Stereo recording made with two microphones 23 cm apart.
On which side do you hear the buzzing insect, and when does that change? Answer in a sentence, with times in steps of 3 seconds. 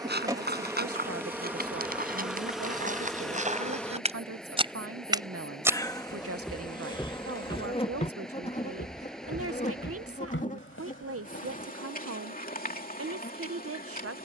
In this clip you hear the buzzing insect in the centre from 0 s and on the left from 6 s.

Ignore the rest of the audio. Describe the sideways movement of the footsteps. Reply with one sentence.
You can hear the footsteps move from right to left.